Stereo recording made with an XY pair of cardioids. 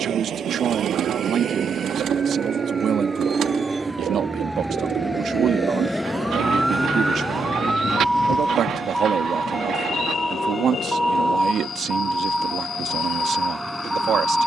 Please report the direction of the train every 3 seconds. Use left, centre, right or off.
right, centre, left, left, left.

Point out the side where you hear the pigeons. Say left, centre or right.
right.